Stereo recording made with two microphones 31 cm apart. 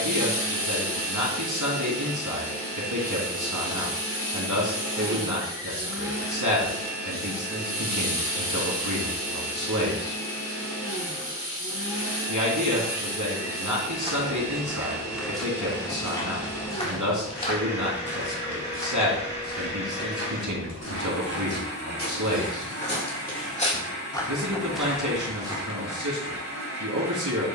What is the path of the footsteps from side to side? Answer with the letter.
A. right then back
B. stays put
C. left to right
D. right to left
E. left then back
E.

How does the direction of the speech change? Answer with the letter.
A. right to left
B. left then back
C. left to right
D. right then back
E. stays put
E.